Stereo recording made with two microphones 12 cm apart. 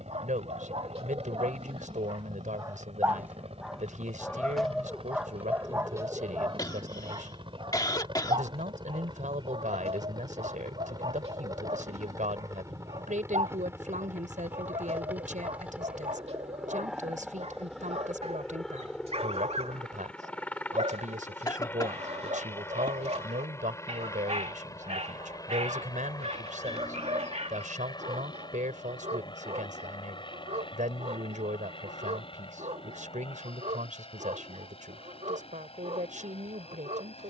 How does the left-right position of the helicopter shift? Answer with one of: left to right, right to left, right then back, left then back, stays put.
right to left.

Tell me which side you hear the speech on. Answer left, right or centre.
right.